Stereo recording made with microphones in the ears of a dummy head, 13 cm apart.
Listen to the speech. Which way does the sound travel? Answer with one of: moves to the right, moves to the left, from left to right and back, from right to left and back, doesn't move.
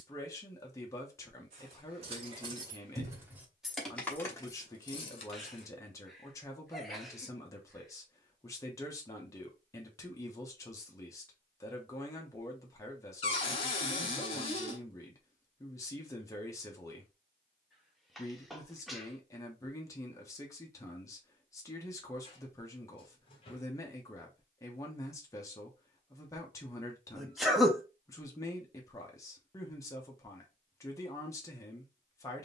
doesn't move.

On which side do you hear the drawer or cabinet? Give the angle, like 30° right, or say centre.
40° left.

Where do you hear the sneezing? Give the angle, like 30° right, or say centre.
centre.